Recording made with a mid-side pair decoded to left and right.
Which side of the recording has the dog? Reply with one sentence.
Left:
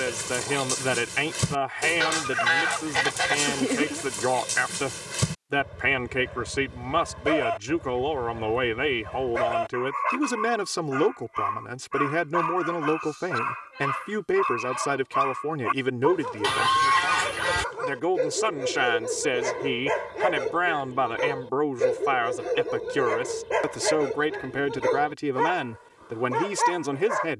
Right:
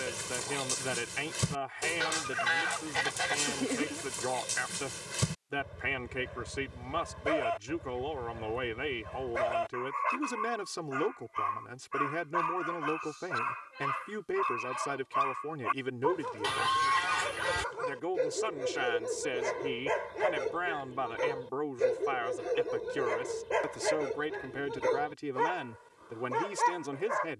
You can hear the dog on the left.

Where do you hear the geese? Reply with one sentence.
You can hear the geese on the left.